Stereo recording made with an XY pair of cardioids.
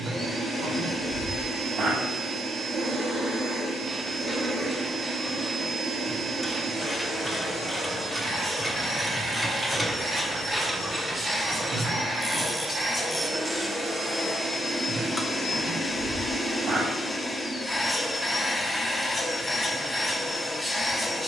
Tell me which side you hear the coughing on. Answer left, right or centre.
right.